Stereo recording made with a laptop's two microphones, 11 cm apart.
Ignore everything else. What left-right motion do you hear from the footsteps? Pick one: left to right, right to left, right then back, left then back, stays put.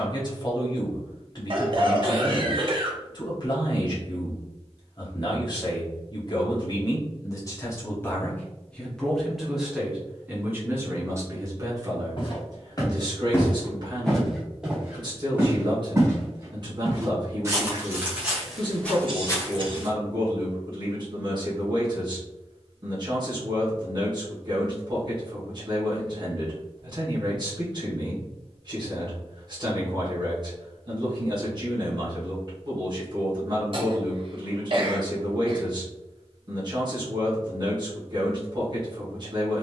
right then back.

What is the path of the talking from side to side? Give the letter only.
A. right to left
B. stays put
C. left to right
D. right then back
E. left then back
C.